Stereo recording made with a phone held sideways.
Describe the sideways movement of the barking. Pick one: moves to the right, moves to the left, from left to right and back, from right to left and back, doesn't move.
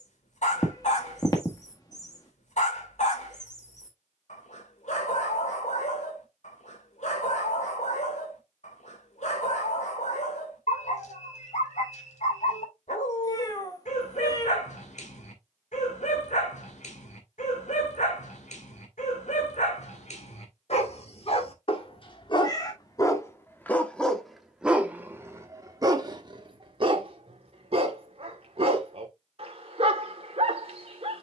moves to the right.